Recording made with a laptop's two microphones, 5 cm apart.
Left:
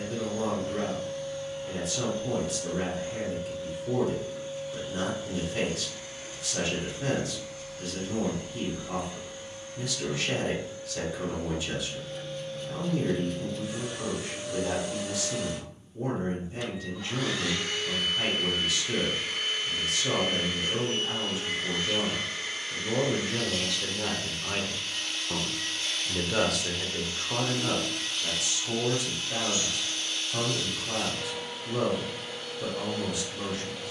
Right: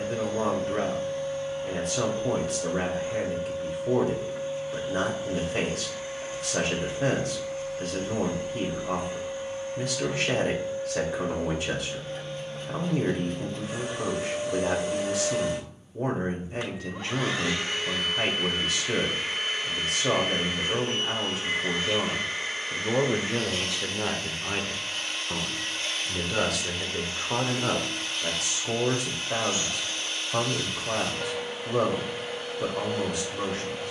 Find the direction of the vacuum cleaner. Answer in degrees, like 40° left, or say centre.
50° right.